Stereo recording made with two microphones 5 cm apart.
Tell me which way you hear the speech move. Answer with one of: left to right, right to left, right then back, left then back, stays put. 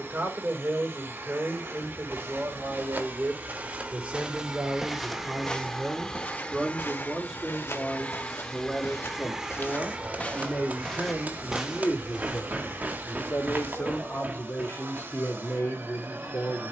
right to left.